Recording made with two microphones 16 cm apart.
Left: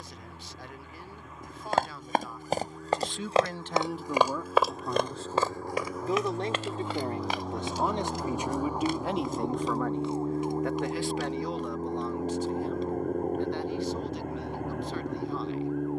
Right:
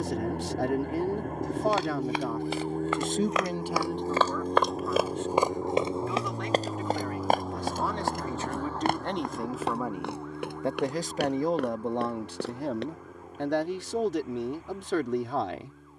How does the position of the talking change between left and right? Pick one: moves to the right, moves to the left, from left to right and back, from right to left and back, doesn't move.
from right to left and back.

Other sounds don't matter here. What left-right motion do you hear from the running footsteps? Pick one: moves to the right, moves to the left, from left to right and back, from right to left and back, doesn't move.
moves to the right.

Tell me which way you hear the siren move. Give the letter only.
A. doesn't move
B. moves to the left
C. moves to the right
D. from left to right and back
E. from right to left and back
B.